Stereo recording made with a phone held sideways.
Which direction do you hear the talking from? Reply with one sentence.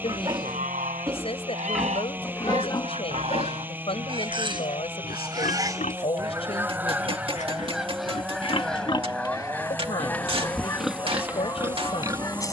In this clip you hear the talking on the left.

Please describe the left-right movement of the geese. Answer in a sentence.
In this clip you hear the geese go from the right side to the left.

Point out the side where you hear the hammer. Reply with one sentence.
You can hear the hammer on the right.